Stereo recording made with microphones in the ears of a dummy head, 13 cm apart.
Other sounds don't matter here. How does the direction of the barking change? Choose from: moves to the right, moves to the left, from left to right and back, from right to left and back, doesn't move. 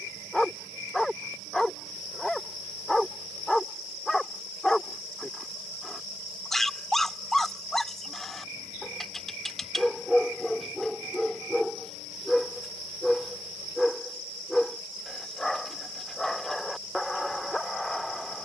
doesn't move.